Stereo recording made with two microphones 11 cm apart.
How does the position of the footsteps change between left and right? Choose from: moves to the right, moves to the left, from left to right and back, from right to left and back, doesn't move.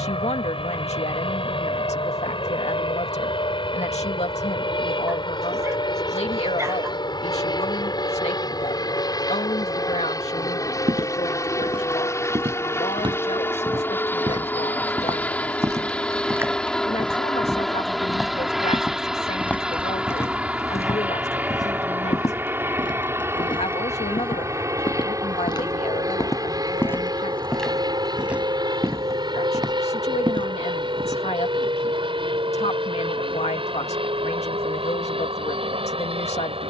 from right to left and back.